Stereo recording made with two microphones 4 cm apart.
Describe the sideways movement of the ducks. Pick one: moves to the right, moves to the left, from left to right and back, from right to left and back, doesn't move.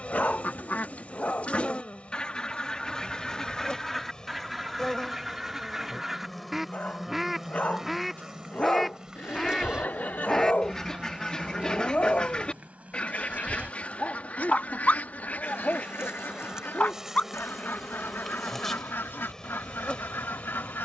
from left to right and back.